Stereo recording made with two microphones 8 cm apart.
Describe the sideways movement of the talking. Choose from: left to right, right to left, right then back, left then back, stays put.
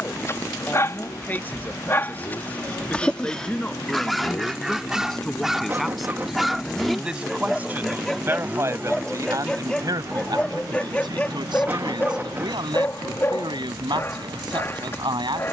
left to right.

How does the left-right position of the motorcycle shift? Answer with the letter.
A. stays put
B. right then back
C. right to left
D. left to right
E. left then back
D.